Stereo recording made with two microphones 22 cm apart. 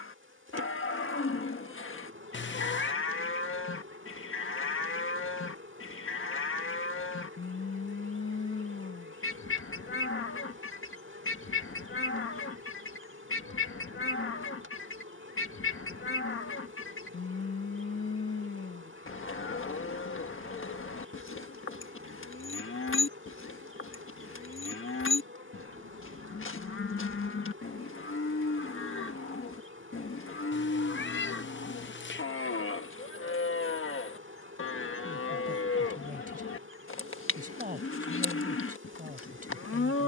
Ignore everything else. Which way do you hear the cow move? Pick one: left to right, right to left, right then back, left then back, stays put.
stays put.